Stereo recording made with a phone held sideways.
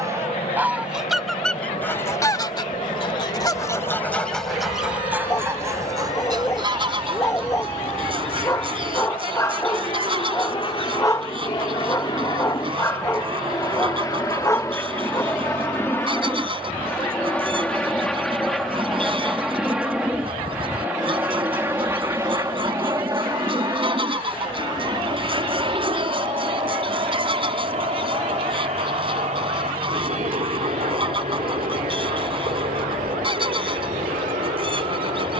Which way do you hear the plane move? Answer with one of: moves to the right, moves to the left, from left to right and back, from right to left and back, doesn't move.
moves to the right.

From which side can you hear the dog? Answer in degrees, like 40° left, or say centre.
20° left.